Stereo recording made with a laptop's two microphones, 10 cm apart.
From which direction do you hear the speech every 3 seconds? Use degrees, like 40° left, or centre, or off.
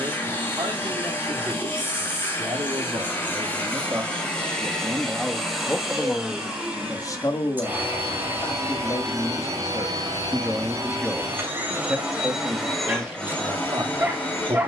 50° right, 20° right, 30° left, 10° left, 30° right.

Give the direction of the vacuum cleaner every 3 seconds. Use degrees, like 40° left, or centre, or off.
20° left, 10° left, 20° right, 30° right, 10° left.